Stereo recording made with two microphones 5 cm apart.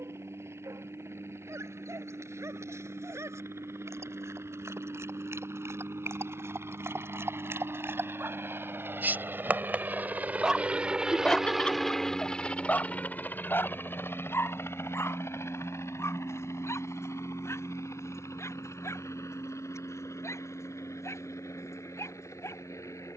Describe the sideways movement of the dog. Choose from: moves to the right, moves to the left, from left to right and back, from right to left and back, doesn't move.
moves to the left.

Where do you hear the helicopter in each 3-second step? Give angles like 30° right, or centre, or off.
80° right, 70° right, 60° right, 30° right, 40° left, 70° left, 80° left, 80° left.